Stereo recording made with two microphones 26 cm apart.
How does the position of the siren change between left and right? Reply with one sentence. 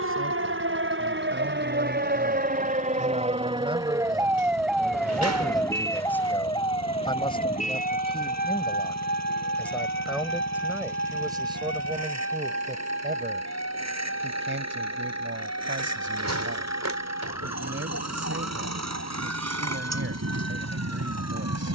In this clip you hear the siren move from right to left.